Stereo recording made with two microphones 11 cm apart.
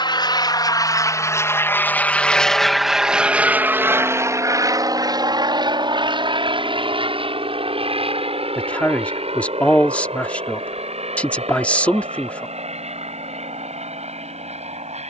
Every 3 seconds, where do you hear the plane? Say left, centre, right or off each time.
left, right, right, right, right.